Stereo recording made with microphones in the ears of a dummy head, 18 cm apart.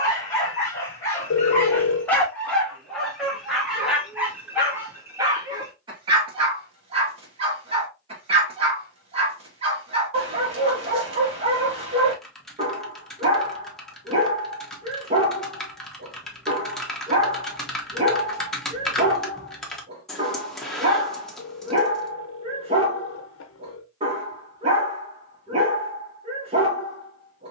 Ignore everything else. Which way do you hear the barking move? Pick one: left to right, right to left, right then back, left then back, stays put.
left to right.